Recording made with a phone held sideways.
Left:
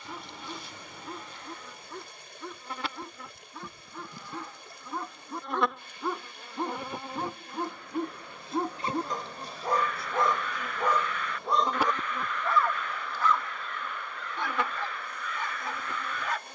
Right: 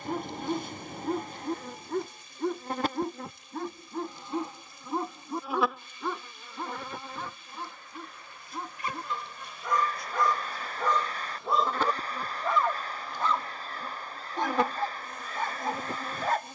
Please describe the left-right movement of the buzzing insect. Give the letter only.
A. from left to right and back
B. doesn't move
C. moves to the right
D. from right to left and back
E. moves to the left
D.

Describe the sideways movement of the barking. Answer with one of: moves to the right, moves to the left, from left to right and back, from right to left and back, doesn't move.
from right to left and back.